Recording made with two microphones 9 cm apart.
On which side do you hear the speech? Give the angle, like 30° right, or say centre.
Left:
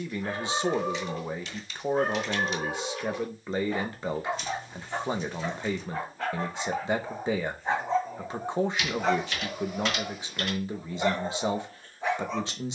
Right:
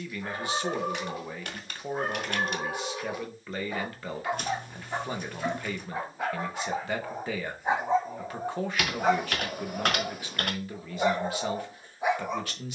20° left.